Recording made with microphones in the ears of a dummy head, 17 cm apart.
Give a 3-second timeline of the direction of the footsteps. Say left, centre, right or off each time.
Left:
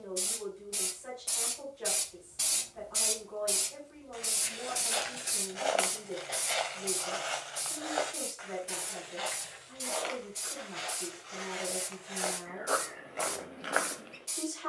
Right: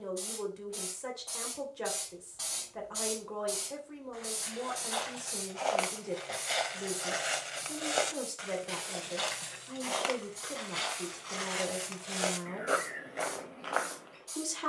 off, left, right, right, centre.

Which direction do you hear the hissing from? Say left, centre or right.
left.